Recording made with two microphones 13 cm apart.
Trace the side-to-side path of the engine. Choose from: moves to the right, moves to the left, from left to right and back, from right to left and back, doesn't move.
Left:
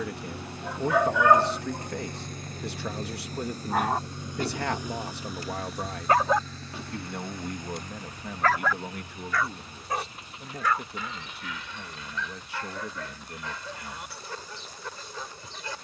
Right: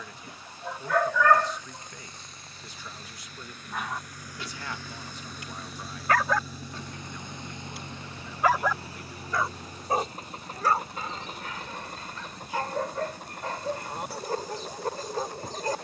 moves to the right.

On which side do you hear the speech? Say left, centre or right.
left.